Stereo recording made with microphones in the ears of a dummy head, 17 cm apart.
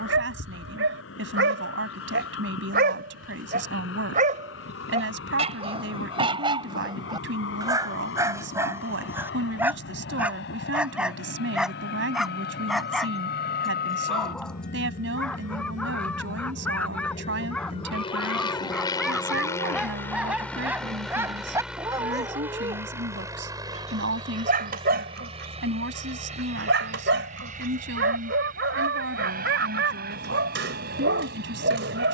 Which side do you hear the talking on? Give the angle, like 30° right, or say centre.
70° right.